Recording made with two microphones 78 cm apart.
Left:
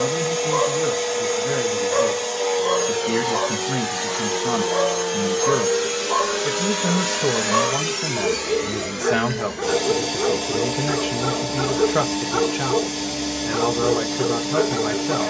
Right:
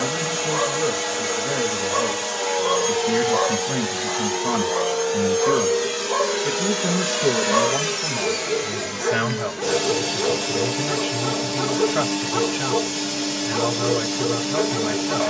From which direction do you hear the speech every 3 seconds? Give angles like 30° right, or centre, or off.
20° right, 10° right, 40° left, 70° left, 70° left.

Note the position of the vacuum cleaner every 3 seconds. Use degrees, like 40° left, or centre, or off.
40° right, 10° left, 10° right, 40° right, 40° right.